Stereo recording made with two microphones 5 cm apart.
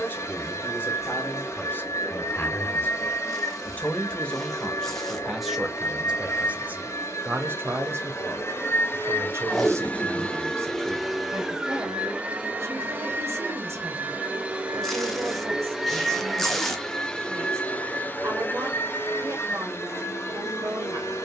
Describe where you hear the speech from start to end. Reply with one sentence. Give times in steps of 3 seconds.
You can hear the speech on the left from 0 s, in the centre from 3 s and on the right from 6 s.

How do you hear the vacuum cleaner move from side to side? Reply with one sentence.
You can hear the vacuum cleaner move from left to right and back again.